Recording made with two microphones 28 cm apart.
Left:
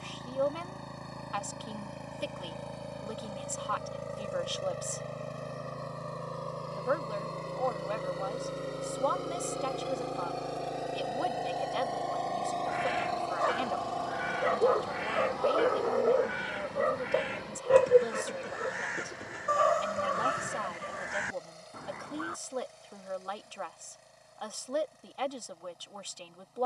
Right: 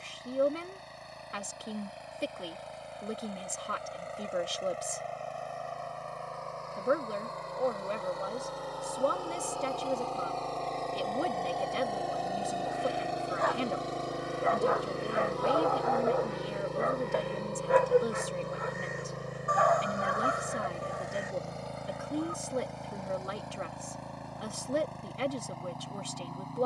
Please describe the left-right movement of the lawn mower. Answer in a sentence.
In this clip you hear the lawn mower move from left to right.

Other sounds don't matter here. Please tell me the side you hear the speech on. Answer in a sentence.
In this clip you hear the speech on the right.